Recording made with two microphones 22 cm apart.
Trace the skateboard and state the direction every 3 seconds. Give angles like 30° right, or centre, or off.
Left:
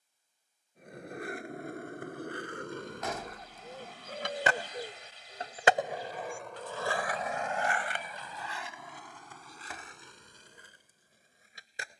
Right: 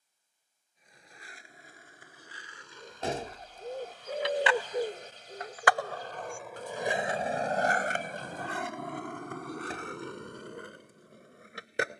70° left, 50° left, 30° right, 70° right.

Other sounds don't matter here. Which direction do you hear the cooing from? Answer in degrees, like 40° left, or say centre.
50° right.